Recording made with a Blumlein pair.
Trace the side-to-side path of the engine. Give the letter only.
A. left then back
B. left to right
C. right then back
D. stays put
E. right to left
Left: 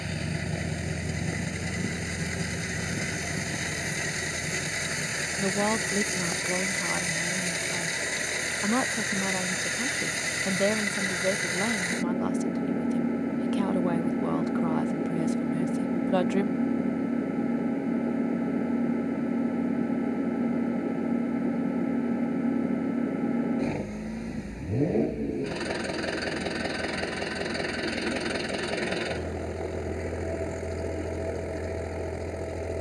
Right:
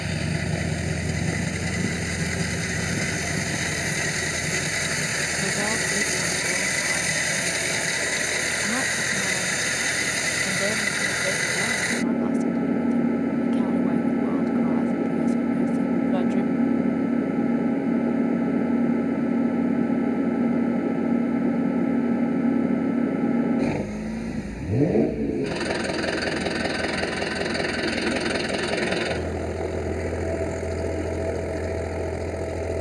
D.